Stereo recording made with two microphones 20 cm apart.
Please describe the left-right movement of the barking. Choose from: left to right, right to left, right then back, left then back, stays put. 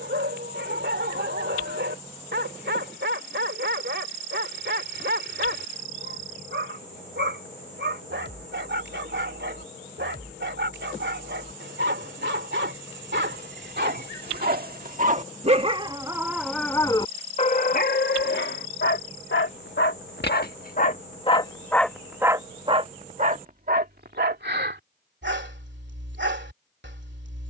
left then back.